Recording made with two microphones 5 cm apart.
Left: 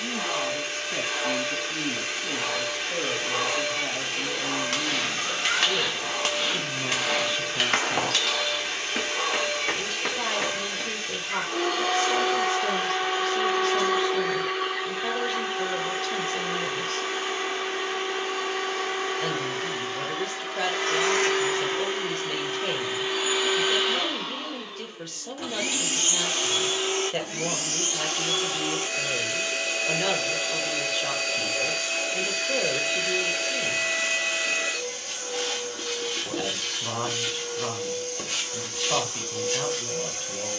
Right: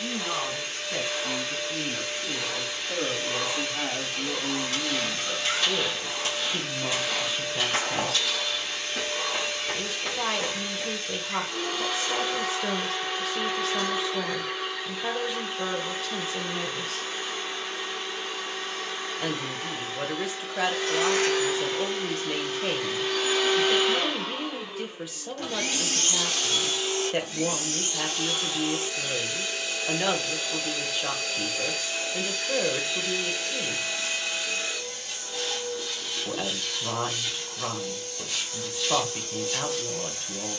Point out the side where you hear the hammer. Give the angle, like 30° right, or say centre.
70° left.